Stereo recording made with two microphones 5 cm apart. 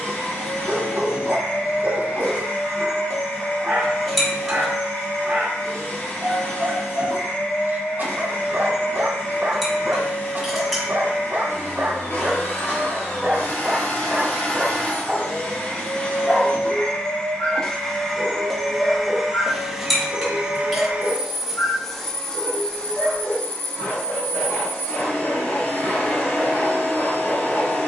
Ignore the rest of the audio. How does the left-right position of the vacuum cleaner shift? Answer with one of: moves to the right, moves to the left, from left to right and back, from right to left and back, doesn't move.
from left to right and back.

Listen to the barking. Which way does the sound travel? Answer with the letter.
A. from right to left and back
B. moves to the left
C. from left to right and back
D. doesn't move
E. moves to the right
B.